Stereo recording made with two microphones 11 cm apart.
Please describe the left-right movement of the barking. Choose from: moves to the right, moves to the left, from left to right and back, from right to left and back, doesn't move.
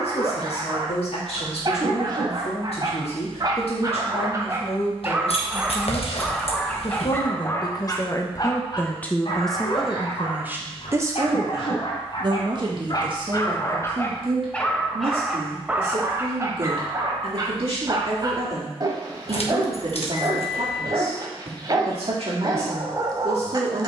from right to left and back.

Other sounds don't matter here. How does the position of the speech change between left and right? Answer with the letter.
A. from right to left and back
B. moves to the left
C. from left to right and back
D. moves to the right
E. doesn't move
D.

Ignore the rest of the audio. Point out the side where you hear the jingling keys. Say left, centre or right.
left.